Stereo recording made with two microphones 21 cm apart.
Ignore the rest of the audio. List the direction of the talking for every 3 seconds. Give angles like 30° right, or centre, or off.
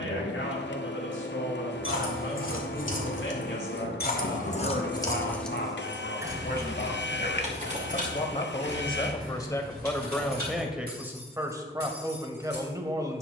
70° left, 60° left, 40° left, centre, 20° right.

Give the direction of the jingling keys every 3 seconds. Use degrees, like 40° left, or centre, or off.
80° left, 30° left, 30° right, 50° right, 50° right.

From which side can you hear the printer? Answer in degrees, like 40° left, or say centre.
60° left.